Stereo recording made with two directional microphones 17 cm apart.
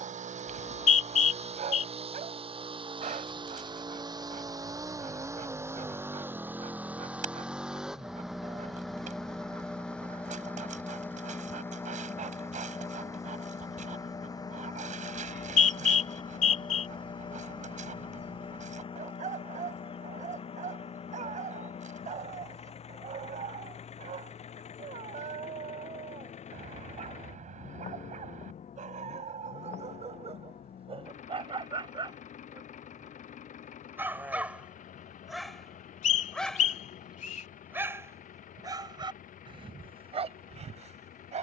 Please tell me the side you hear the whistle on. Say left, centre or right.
left.